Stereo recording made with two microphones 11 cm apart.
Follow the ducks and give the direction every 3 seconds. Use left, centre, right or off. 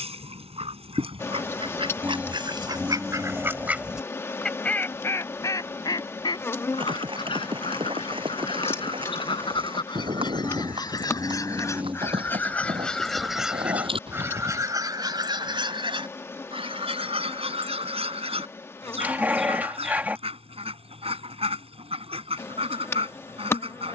right, centre, left, left, centre, right, right, right.